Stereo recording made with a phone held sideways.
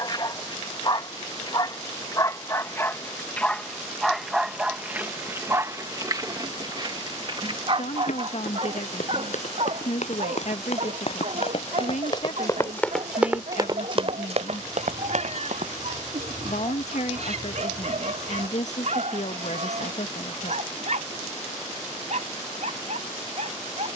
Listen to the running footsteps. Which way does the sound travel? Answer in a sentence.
You can hear the running footsteps move to the right.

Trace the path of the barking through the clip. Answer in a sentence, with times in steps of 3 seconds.
You can hear the barking on the left from 0 s, in the centre from 3 s and on the right from 6 s.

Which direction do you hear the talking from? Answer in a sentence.
In this clip you hear the talking on the left.